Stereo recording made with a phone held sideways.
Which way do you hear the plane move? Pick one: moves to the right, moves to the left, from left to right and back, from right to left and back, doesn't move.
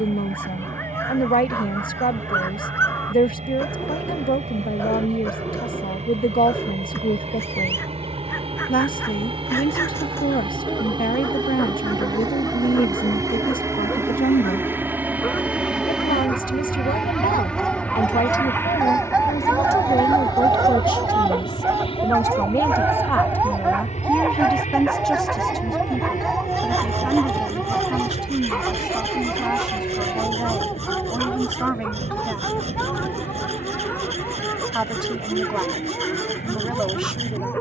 moves to the left.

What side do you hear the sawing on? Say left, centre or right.
right.